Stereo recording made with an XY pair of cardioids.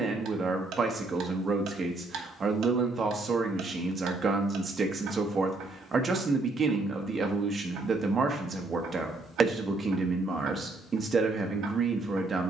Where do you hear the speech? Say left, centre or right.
right.